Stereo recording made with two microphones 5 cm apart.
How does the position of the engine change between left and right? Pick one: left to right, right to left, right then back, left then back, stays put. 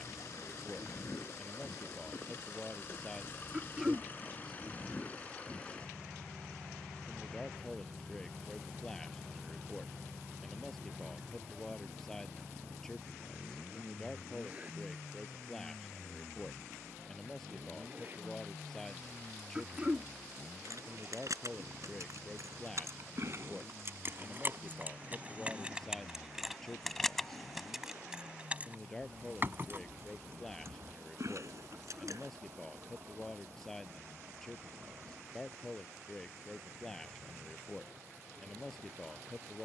left to right.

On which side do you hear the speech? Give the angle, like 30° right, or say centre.
10° left.